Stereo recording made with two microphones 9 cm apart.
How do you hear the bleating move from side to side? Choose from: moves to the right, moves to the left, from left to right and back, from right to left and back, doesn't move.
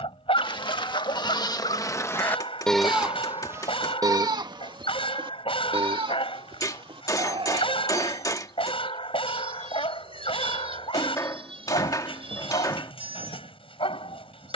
moves to the right.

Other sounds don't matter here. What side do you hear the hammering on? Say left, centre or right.
left.